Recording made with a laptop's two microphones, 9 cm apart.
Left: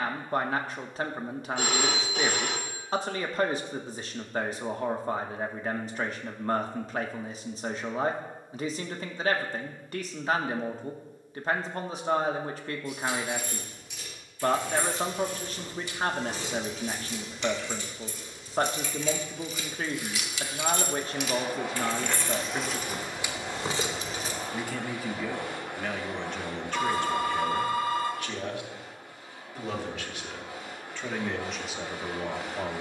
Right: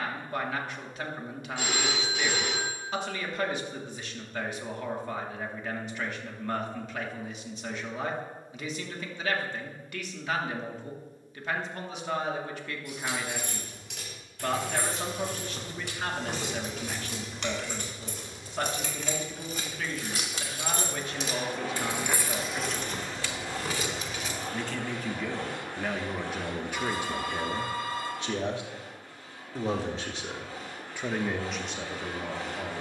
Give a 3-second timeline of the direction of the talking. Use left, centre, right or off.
left, left, left, left, left, left, left, left, centre, right, centre.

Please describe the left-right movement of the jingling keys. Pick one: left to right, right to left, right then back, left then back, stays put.
right to left.